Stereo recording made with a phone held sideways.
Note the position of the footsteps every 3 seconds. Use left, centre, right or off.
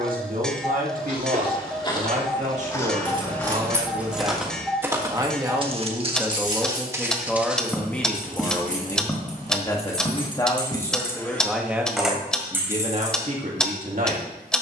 left, centre, centre, left, off.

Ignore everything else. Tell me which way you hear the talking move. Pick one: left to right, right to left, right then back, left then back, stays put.
left then back.